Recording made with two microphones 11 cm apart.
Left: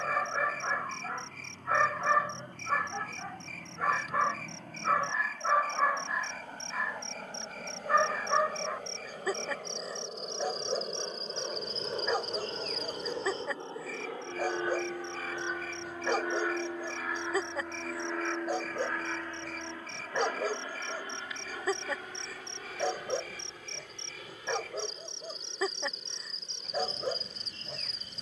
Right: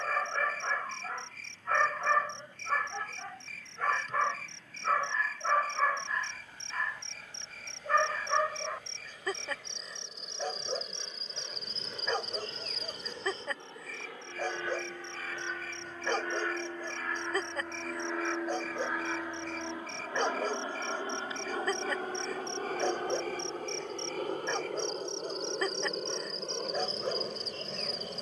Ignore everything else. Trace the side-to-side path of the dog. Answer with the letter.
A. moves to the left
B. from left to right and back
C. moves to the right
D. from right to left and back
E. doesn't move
E.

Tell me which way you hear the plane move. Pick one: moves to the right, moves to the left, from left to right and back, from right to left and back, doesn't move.
moves to the right.